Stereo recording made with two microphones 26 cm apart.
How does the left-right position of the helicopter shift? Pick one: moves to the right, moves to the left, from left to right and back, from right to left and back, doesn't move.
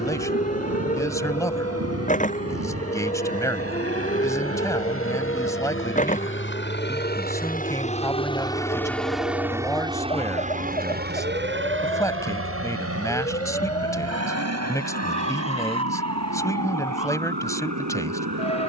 moves to the right.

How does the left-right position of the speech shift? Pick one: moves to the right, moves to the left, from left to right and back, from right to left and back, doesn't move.
doesn't move.